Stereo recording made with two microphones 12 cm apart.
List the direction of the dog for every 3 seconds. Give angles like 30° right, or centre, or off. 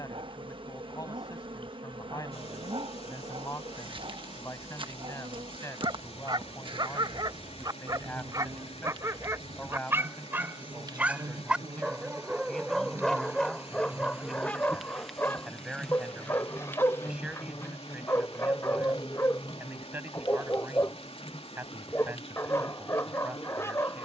50° right, 50° right, 40° right, 20° right, centre, 20° left, 20° left, 20° left.